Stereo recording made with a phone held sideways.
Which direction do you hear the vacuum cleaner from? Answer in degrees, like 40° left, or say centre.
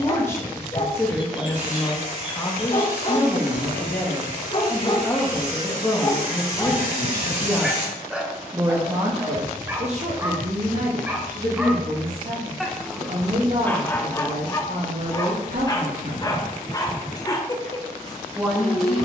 50° right.